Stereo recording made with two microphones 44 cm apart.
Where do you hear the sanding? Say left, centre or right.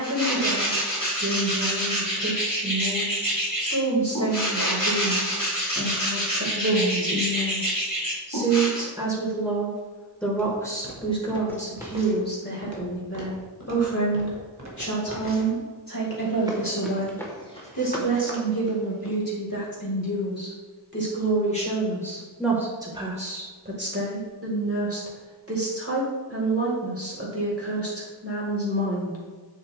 left.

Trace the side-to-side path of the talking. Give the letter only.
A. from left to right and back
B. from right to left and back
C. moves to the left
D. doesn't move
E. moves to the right
B.